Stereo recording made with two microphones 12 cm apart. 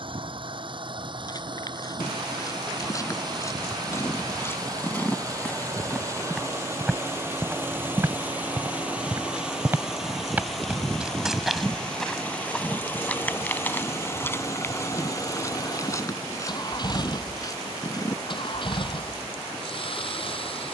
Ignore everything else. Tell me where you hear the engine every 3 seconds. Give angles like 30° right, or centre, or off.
40° right, 30° right, 20° right, centre, 20° left, 40° left, 50° left.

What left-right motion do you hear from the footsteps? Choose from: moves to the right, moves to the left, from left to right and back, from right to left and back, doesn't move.
from left to right and back.